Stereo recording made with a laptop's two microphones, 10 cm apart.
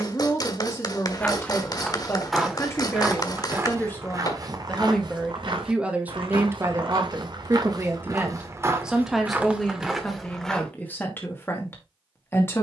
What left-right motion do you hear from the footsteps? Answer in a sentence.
In this clip you hear the footsteps go right and come back.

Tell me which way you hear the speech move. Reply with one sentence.
You can hear the speech move from left to right and back again.